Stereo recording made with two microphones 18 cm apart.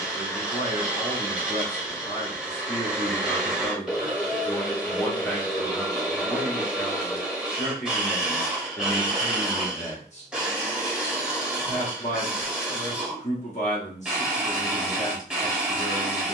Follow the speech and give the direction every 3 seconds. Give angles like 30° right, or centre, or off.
40° left, 10° left, centre, 30° left, 40° left, 40° left.